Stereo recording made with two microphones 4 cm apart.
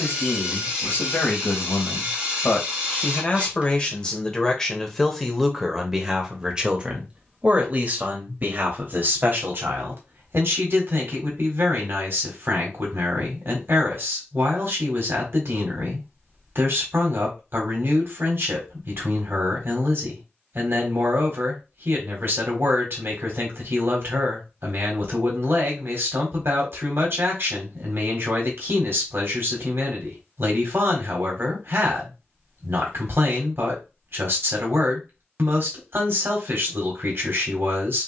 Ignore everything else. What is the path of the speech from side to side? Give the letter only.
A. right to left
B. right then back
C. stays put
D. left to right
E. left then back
D.